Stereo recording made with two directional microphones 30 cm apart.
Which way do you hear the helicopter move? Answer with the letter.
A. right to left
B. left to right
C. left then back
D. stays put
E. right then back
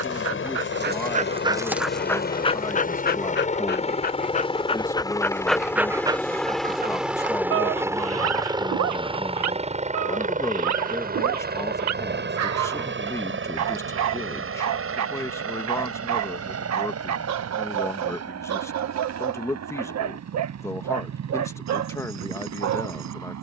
B.